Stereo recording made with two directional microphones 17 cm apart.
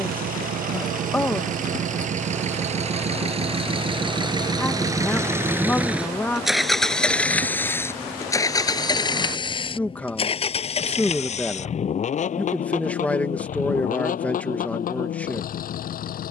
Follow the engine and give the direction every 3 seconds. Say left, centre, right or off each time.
right, right, centre, left, left, left.